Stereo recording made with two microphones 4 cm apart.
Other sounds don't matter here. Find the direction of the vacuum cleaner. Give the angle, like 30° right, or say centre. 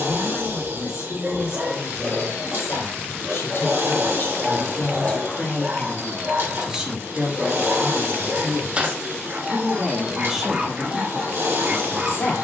60° right.